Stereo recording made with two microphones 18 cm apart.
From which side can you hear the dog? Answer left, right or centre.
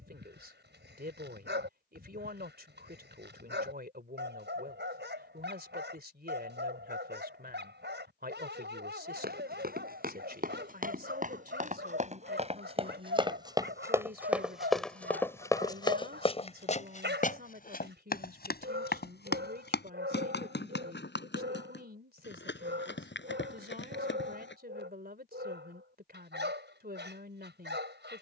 right.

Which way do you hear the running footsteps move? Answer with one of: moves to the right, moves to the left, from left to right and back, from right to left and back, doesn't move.
moves to the left.